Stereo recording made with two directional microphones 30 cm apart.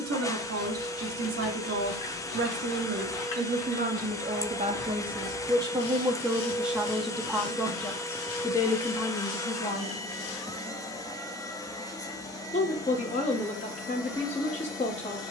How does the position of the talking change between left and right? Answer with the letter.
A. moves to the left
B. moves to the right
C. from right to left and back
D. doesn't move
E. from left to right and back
A.